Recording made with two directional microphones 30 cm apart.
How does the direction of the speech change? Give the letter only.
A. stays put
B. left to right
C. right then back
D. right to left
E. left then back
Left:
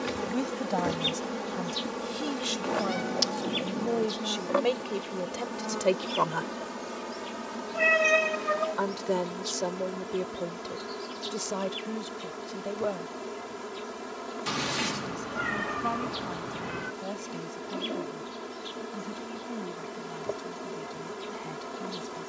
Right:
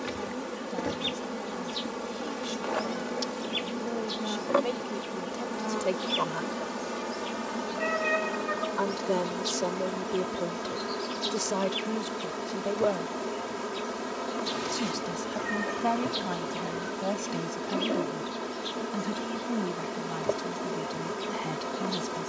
B.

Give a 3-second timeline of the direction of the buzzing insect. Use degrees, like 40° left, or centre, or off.
10° left, 10° right, 20° right, 30° right, 30° right, 30° right, 30° right, 30° right.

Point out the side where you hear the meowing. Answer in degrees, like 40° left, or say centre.
50° left.